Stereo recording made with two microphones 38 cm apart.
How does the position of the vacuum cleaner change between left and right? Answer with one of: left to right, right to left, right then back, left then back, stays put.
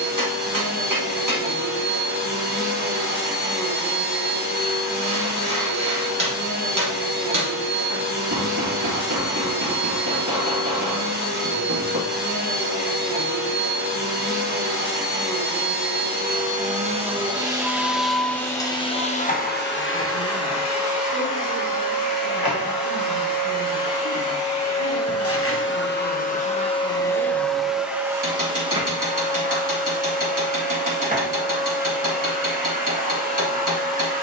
left then back.